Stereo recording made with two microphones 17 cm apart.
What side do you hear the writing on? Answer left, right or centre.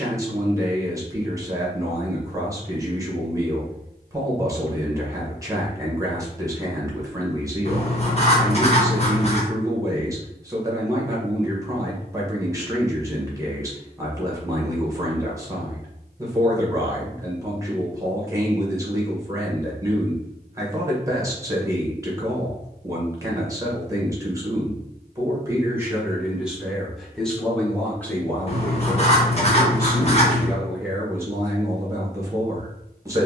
left.